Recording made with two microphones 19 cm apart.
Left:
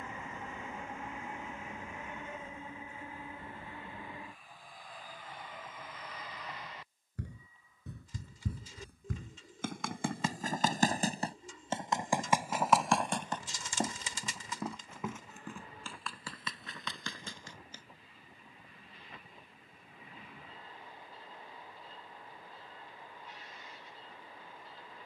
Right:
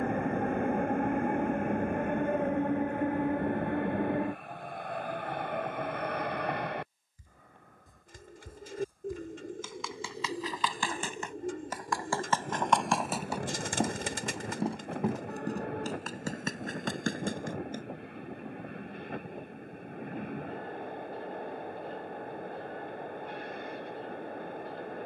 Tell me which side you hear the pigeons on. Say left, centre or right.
right.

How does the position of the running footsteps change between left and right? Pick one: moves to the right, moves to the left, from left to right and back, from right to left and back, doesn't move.
moves to the right.